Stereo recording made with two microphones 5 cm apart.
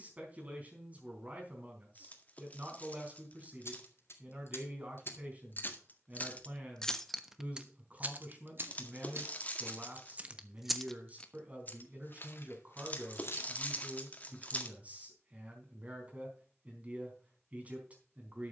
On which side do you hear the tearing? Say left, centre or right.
left.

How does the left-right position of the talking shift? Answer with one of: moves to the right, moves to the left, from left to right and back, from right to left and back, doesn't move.
doesn't move.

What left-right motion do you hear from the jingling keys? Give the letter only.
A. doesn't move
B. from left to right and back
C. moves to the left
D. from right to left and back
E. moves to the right
B.